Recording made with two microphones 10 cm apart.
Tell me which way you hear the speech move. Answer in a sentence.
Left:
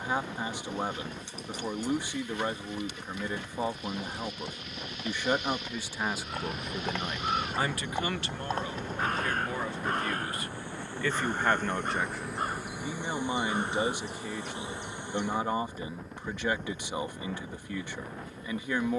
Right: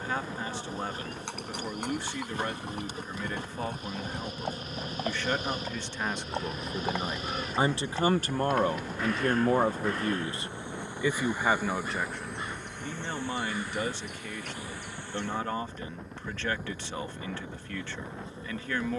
In this clip you hear the speech go right and come back.